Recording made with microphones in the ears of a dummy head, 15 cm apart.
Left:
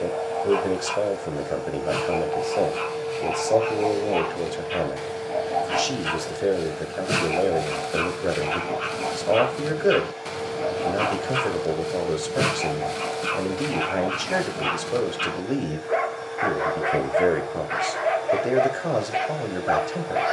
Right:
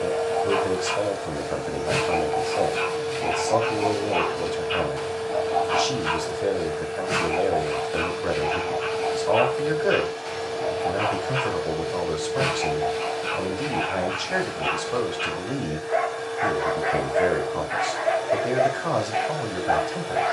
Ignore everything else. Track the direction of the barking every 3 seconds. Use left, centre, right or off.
centre, centre, left, left, left, left, left.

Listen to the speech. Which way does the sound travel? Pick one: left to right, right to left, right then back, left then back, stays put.
stays put.